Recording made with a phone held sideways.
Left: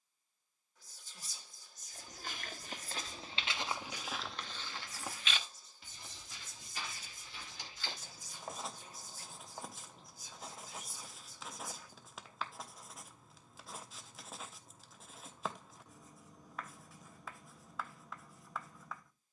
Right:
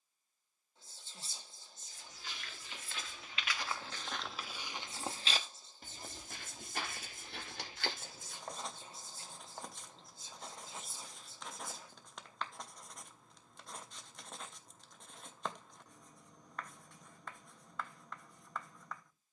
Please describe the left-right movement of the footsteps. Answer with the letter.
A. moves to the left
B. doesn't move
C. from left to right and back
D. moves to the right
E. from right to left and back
D.